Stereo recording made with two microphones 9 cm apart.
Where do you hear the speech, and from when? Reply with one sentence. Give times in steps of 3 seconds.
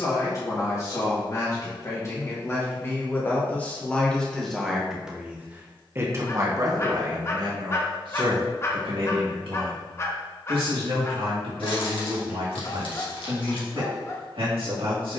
In this clip you hear the speech on the left from 0 s, in the centre from 3 s and on the right from 6 s.